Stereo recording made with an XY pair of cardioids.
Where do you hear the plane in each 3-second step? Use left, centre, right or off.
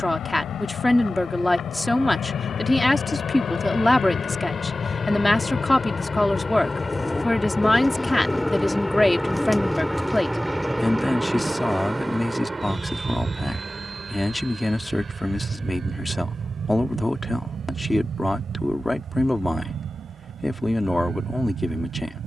left, left, centre, centre, right, right, right, right.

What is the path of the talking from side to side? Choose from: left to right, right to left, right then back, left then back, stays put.
stays put.